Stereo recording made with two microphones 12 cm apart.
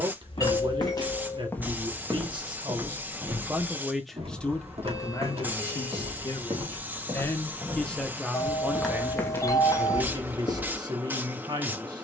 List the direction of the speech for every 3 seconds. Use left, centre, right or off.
right, centre, centre, right.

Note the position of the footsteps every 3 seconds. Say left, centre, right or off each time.
centre, right, right, left.